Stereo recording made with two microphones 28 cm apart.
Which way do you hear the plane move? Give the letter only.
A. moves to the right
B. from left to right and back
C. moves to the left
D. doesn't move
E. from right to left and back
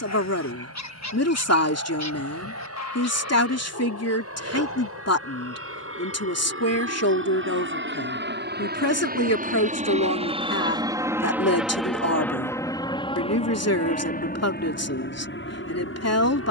C.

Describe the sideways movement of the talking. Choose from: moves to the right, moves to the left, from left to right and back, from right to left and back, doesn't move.
doesn't move.